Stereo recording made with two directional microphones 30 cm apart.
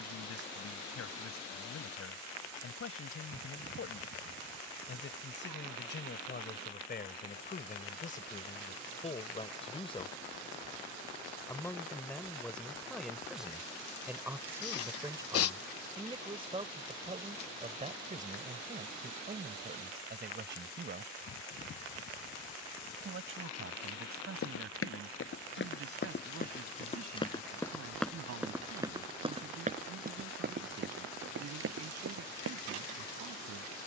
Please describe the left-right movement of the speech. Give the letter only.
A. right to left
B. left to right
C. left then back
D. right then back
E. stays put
B.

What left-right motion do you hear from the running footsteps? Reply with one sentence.
You can hear the running footsteps travel towards the right.